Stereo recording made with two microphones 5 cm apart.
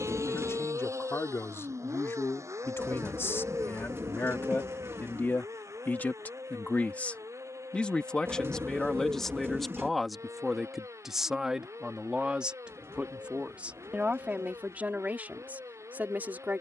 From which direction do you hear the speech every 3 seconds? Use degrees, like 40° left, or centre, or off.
70° left, 50° left, 30° left, centre, 20° right, 30° right.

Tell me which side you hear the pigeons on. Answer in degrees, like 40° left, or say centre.
60° right.